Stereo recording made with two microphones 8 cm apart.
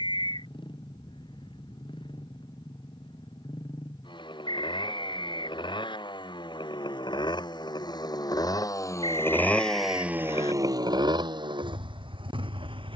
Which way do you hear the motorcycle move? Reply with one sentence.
In this clip you hear the motorcycle travel towards the right.